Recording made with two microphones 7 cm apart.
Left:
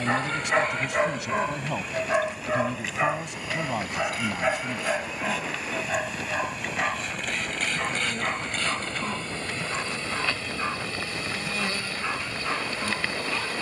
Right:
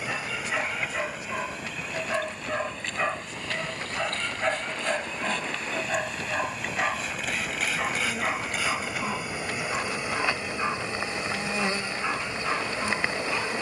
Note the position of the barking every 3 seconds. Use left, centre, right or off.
left, centre, centre, centre, centre.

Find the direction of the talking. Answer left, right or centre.
left.